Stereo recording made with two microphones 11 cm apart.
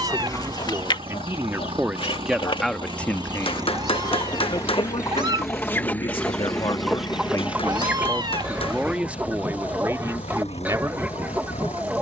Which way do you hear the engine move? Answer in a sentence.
You can hear the engine go from the right side to the left.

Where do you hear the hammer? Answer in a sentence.
In this clip you hear the hammer on the left.